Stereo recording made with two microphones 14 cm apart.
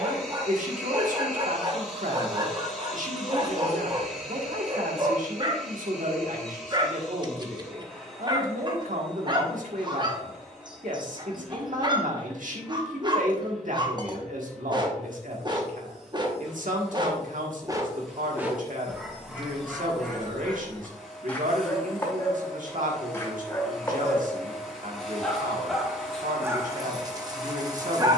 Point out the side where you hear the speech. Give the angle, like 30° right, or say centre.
80° right.